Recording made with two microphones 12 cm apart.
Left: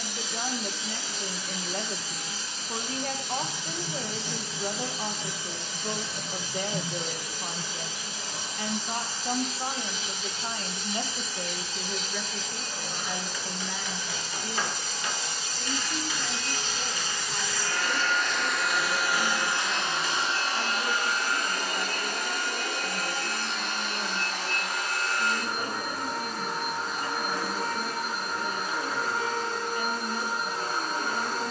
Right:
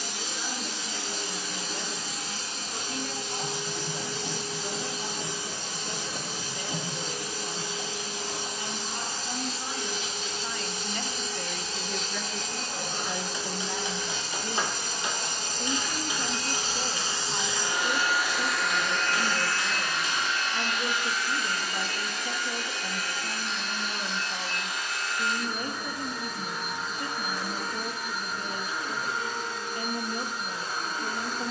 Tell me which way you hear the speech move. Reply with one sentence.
You can hear the speech go from the left side to the right.